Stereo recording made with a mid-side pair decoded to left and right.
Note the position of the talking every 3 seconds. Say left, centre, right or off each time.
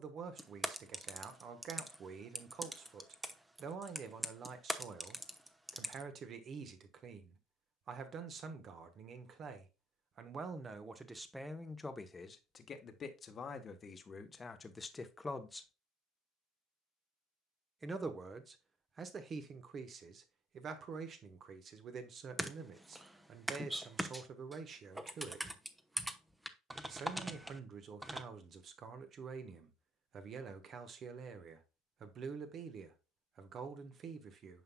right, right, right, right, left, centre, right, right, right, right, right, right.